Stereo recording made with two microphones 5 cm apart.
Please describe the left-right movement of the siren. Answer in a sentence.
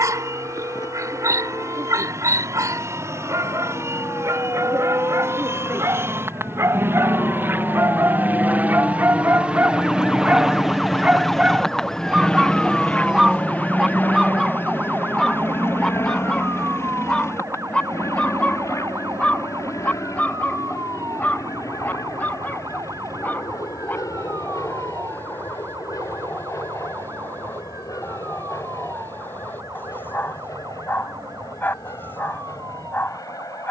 In this clip you hear the siren move to the right.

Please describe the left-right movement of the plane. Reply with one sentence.
In this clip you hear the plane move to the left.